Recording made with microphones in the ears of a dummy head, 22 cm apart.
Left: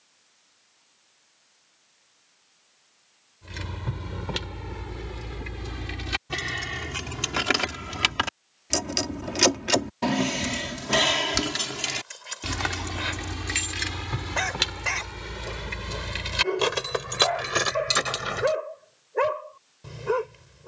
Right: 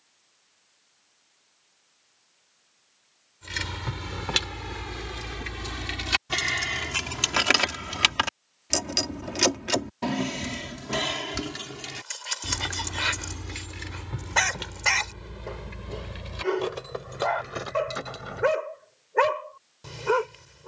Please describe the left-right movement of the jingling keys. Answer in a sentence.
In this clip you hear the jingling keys move from right to left.